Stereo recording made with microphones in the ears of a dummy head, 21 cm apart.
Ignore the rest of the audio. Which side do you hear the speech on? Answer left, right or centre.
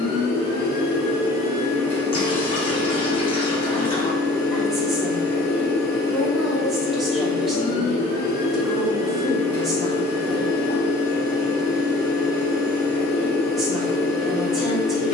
centre.